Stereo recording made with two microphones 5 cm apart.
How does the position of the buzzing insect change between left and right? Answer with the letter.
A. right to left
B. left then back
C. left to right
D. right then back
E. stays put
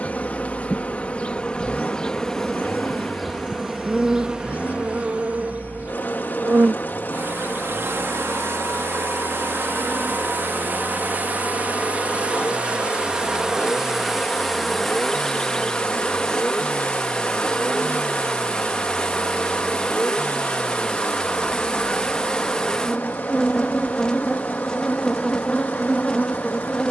D.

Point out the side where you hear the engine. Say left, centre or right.
left.